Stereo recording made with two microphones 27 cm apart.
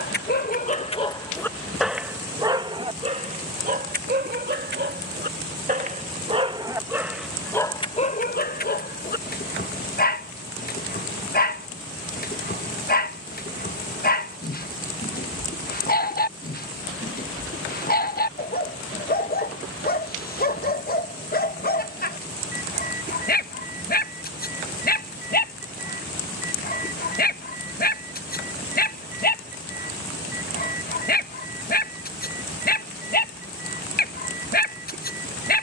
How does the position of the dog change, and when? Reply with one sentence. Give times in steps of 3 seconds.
You can hear the dog in the centre from 0 s, on the right from 3 s, in the centre from 6 s and on the left from 9 s.